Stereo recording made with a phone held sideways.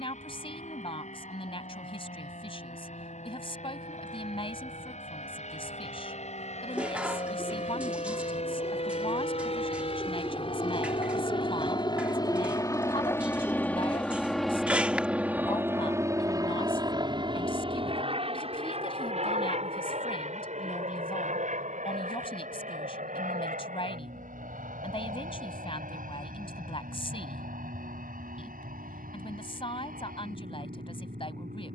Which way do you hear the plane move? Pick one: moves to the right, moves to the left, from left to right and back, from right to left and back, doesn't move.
moves to the right.